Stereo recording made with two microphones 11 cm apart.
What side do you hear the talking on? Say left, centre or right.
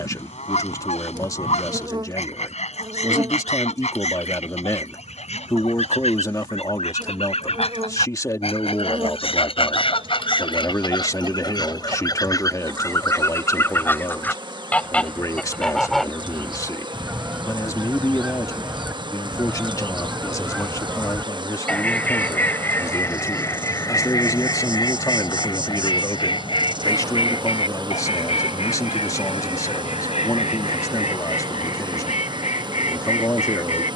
left.